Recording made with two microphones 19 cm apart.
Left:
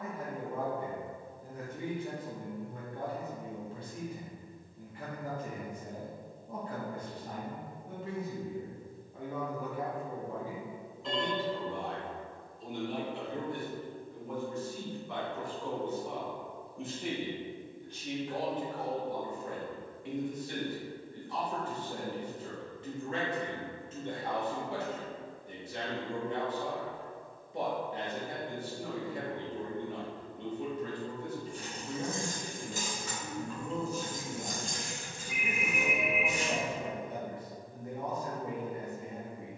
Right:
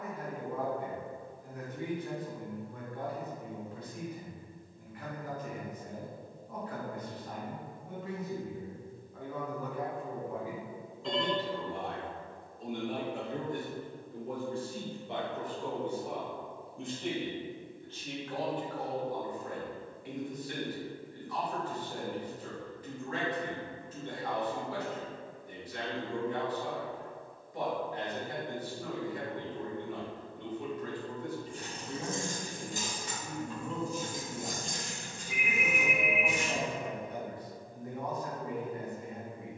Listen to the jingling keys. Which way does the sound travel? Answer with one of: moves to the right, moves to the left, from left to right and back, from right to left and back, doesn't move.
moves to the left.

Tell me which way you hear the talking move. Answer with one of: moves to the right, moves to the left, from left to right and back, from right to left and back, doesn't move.
from left to right and back.